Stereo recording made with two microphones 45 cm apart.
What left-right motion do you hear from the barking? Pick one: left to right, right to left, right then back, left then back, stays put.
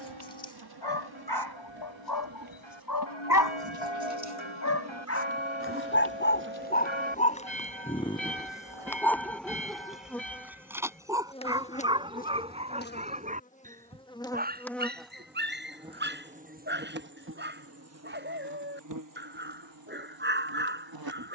left to right.